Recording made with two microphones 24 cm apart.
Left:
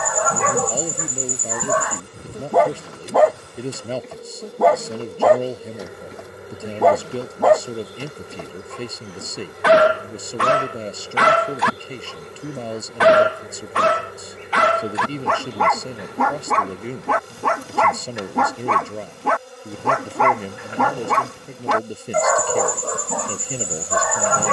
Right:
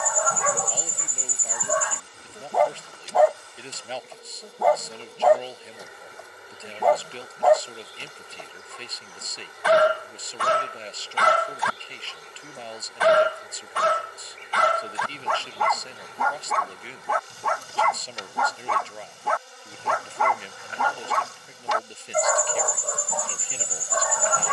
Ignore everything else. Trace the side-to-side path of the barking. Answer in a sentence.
In this clip you hear the barking stay in one place.